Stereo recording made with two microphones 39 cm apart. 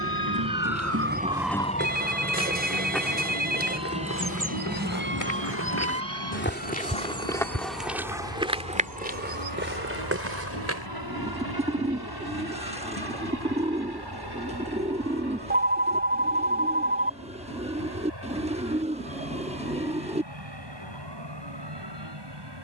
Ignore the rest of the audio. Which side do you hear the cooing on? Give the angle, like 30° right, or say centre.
20° right.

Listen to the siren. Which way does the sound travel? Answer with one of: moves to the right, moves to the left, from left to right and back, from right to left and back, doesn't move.
moves to the left.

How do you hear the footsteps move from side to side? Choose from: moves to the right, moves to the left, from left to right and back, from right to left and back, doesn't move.
from right to left and back.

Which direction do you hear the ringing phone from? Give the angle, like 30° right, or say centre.
20° right.